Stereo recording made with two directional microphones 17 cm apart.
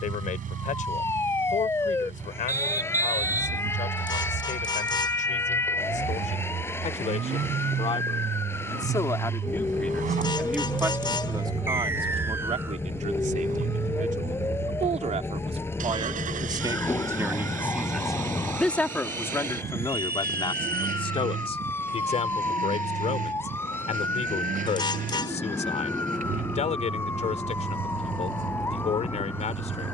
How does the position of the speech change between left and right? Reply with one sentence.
You can hear the speech go right and come back.